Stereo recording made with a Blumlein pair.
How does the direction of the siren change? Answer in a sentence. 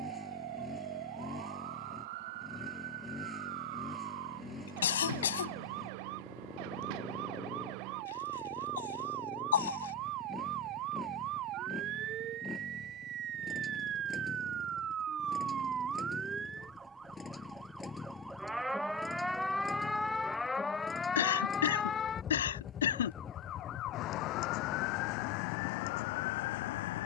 You can hear the siren move to the left.